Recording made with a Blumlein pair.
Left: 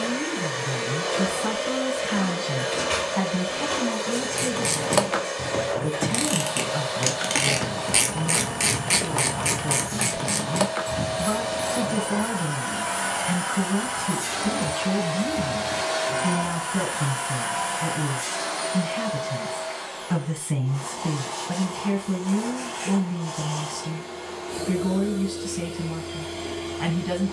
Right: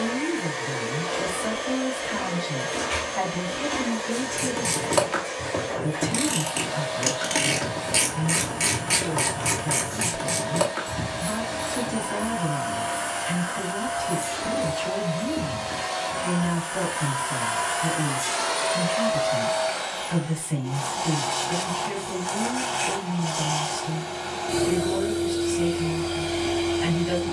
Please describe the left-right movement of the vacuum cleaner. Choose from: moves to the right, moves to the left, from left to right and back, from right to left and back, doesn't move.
moves to the right.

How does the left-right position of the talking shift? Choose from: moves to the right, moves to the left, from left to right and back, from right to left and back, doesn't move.
doesn't move.